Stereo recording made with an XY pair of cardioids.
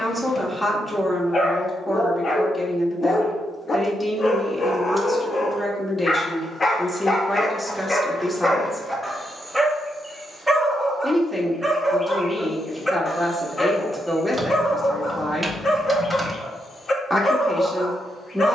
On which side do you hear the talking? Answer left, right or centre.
centre.